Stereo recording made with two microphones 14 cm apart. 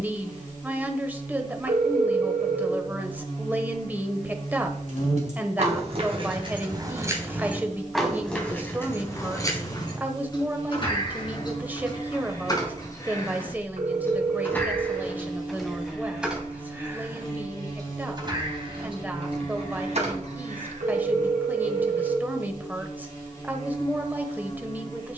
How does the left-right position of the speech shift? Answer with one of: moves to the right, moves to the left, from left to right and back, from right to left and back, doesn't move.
doesn't move.